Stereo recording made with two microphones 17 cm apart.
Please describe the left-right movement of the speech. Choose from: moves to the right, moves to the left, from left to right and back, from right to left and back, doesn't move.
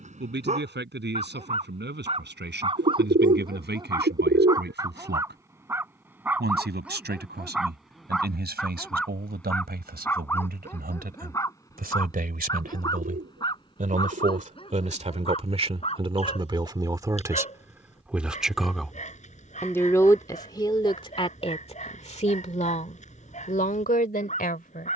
moves to the left.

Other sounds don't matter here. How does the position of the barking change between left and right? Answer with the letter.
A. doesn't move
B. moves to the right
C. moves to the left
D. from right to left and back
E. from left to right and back
C.